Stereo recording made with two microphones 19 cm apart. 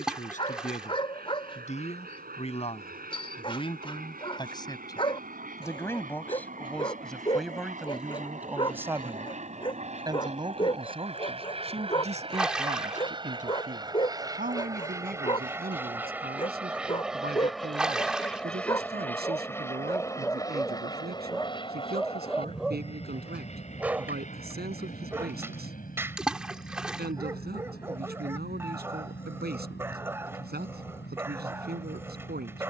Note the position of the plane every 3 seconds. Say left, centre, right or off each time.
right, right, right, right, right, centre, centre, left, left, left, left.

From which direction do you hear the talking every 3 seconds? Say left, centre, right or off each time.
left, left, centre, right, right, right, right, right, right, right, right.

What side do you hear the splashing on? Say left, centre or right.
centre.